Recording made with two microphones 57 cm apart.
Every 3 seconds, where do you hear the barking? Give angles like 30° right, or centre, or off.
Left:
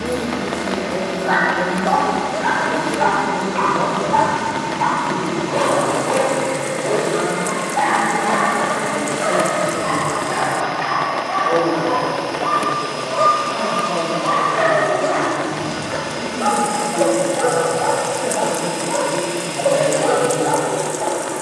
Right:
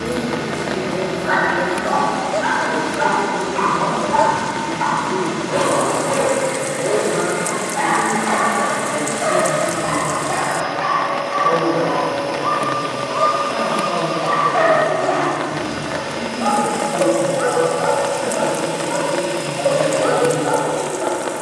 40° right, 40° right, 30° right, centre, centre, 20° right, 30° right.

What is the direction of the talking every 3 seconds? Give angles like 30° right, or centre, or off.
50° left, 50° left, 20° left, 30° right, 60° right, 70° right, 80° right.